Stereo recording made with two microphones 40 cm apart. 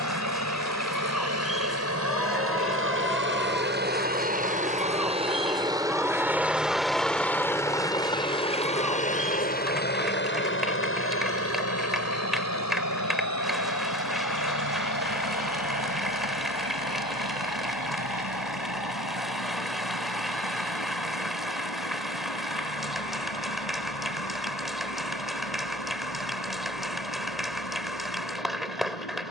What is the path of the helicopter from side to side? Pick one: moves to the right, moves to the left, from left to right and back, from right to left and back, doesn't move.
moves to the left.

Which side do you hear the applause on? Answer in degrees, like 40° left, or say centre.
centre.